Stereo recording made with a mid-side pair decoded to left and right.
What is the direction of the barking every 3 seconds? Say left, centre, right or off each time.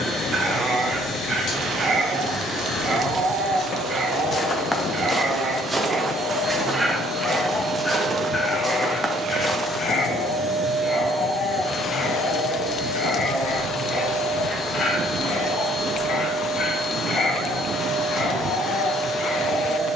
right, right, centre, left, left, left, left.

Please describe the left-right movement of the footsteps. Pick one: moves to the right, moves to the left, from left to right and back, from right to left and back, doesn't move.
from left to right and back.